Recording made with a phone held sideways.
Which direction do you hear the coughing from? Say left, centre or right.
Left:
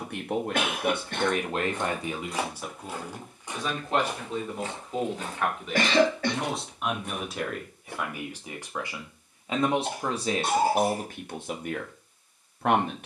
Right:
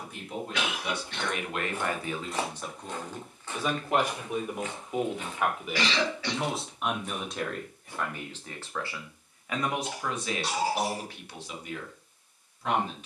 left.